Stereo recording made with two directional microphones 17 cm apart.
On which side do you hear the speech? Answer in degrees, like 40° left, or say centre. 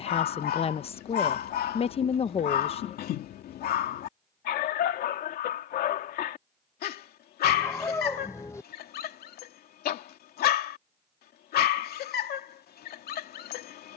40° left.